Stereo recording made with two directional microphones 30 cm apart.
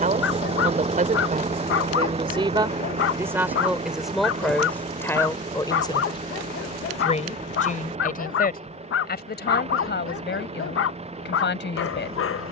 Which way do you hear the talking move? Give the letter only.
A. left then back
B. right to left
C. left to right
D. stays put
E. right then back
B.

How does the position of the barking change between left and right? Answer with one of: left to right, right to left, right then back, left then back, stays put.
stays put.